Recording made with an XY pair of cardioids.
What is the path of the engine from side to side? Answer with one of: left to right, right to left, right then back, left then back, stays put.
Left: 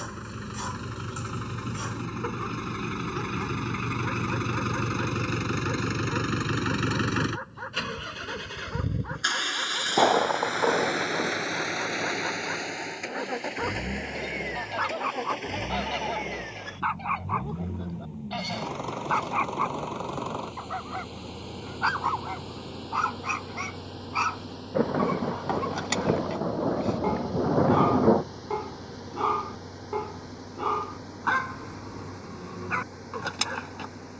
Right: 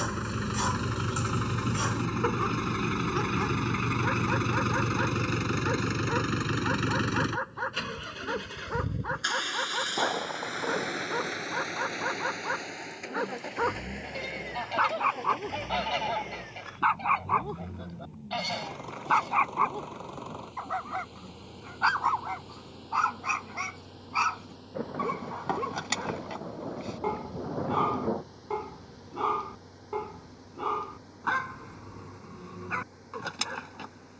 right to left.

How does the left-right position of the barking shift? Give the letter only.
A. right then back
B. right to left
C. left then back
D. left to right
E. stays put
B.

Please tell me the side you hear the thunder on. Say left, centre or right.
left.